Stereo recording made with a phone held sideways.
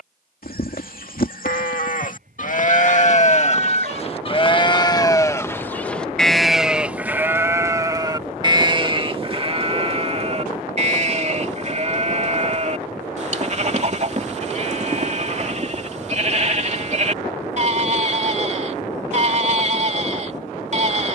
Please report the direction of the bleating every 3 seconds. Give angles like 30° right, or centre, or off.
60° left, 30° left, 20° right, 40° right, 50° right, 50° right, 50° right.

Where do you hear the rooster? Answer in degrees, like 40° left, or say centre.
60° right.